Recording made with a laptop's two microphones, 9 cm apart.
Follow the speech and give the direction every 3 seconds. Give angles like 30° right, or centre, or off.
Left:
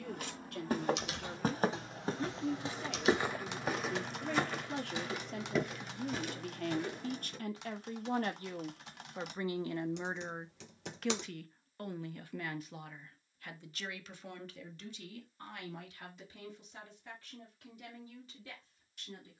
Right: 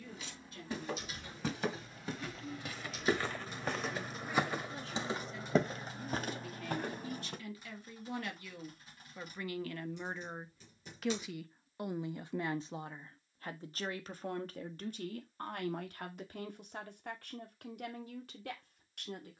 80° left, 70° left, 50° left, 10° left, 40° right, 60° right, 60° right.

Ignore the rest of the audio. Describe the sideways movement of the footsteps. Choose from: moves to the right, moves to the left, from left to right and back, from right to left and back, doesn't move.
moves to the right.